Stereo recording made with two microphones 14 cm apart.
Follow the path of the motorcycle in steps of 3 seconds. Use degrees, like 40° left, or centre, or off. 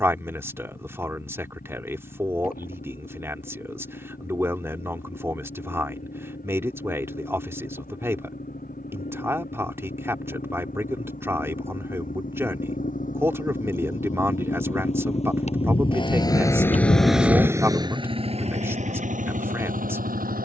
80° left, 80° left, 70° left, 70° left, 60° left, 10° left, 60° right.